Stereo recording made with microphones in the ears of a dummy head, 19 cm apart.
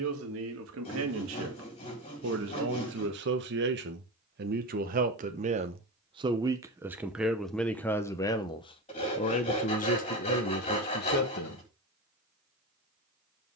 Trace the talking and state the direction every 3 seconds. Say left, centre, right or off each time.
right, right, centre, left, off.